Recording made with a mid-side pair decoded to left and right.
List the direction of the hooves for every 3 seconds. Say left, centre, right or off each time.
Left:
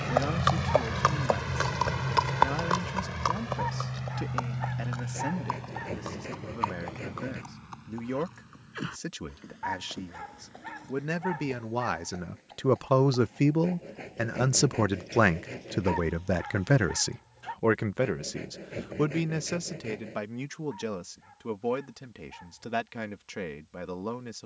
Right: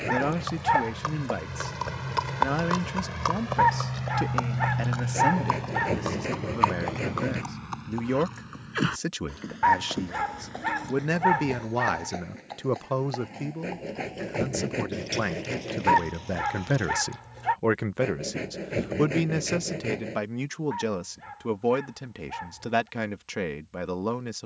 left, right, right, right, right, right, off, off.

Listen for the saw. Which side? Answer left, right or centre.
right.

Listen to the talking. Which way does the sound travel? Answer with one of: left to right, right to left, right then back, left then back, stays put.
left then back.